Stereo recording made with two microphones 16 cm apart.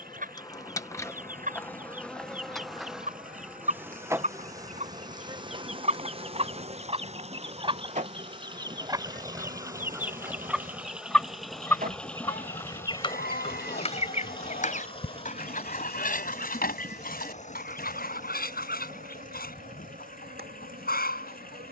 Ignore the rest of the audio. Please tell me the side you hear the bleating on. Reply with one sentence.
In this clip you hear the bleating on the left.